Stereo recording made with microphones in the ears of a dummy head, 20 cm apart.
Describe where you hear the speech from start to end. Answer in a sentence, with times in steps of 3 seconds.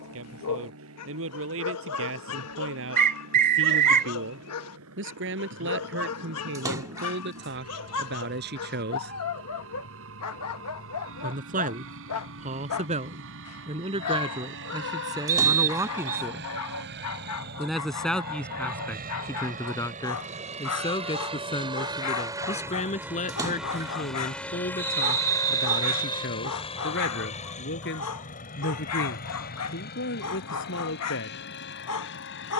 You can hear the speech on the right from 0 s, in the centre from 15 s and on the left from 21 s.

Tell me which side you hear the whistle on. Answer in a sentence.
In this clip you hear the whistle on the right.